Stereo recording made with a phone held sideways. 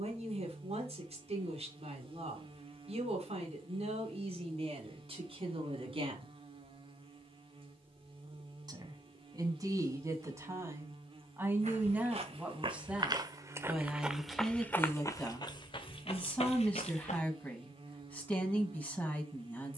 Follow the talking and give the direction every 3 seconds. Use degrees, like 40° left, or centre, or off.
50° right, 50° right, 40° right, 20° right, centre, 10° left, 10° left.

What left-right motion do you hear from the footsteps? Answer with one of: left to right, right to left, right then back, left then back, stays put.
right to left.